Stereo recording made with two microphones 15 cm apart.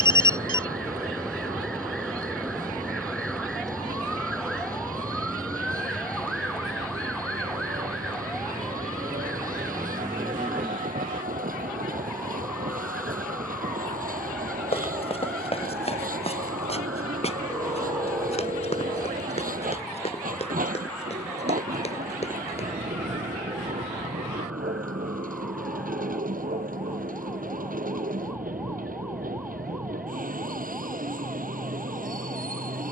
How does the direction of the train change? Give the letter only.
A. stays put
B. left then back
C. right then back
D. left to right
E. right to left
A.